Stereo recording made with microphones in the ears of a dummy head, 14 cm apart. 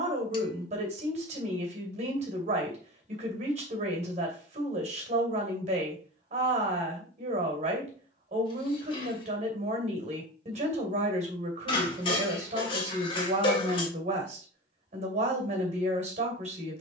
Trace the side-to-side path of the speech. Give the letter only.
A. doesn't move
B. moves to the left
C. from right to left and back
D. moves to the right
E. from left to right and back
A.